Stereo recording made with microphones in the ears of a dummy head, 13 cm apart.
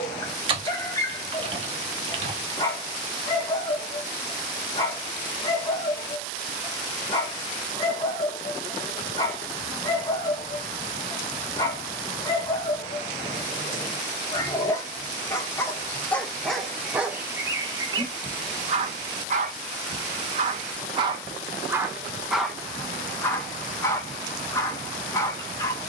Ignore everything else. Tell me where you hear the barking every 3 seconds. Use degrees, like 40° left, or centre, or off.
20° left, 20° left, 20° left, 20° left, 20° left, centre, 40° right, centre, 20° left.